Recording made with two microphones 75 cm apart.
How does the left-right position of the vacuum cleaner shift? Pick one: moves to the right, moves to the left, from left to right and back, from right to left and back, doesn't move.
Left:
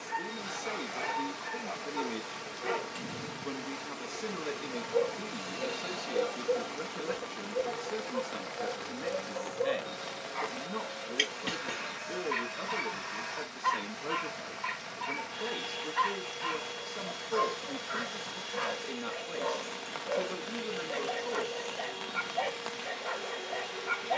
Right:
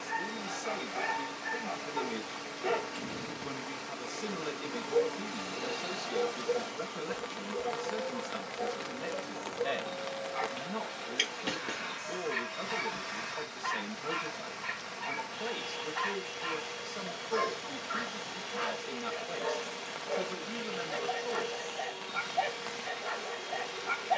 from left to right and back.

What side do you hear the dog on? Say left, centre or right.
centre.